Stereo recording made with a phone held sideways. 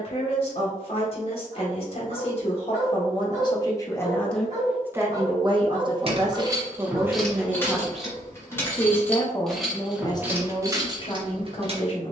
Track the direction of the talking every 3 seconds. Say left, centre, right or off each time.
left, centre, centre, left.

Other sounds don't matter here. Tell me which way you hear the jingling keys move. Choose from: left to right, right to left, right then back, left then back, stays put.
left then back.